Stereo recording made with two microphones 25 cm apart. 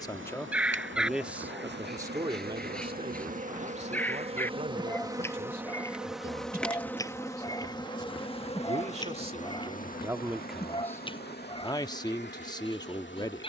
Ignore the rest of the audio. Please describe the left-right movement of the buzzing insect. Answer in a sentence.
In this clip you hear the buzzing insect travel towards the left.